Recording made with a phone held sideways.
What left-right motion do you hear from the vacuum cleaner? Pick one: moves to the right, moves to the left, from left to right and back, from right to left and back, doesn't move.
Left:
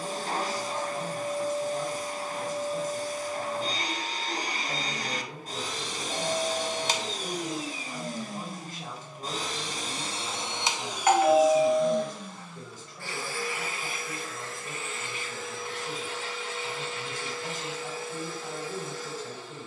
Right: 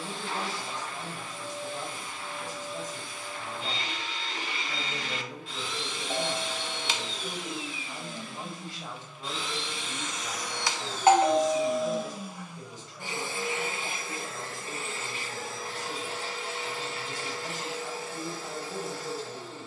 moves to the right.